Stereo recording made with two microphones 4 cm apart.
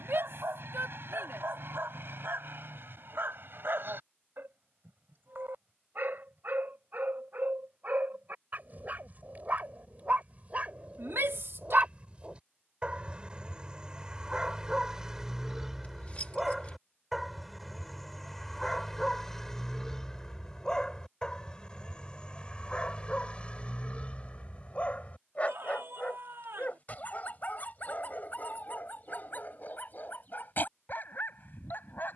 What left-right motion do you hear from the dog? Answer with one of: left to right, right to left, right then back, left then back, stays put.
right to left.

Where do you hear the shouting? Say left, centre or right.
right.